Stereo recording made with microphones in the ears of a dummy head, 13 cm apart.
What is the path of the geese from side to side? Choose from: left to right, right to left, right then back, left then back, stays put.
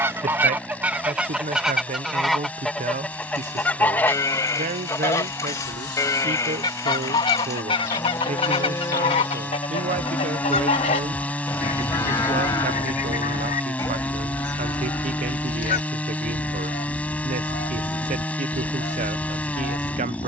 right to left.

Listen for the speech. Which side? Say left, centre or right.
right.